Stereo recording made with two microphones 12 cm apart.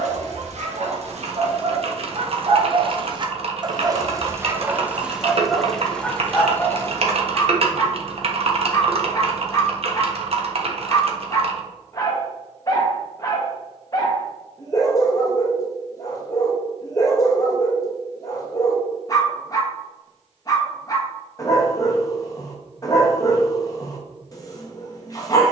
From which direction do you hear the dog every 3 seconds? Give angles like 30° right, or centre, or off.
60° right, 20° right, 20° left, 30° left, 30° left, 30° left, 30° left, 30° left, 30° left.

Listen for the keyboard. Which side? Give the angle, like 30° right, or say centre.
50° right.